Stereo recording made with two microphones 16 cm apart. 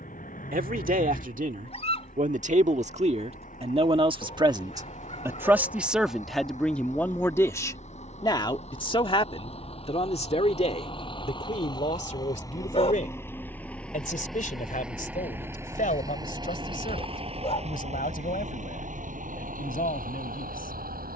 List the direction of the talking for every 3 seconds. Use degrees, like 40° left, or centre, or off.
60° right, 30° right, 10° left, 40° left, 50° left, 60° left, 60° left.